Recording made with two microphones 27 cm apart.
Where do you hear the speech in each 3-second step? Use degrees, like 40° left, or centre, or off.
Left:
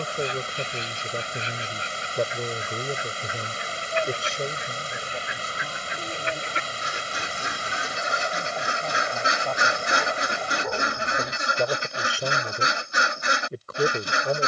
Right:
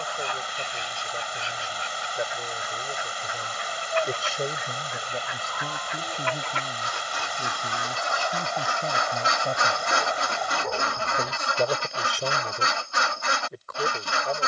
50° left, 10° right, 40° right, 20° right, 30° left.